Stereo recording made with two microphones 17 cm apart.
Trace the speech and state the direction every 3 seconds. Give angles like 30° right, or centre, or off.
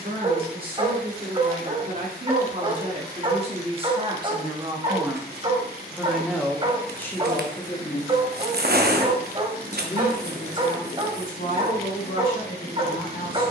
50° right, 30° right, 10° left, 50° left, 60° left.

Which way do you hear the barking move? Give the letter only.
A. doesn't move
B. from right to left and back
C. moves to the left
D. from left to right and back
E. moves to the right
A.